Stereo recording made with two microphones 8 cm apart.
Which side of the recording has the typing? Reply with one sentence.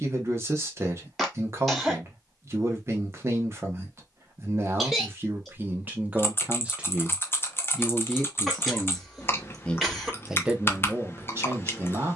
In this clip you hear the typing on the left.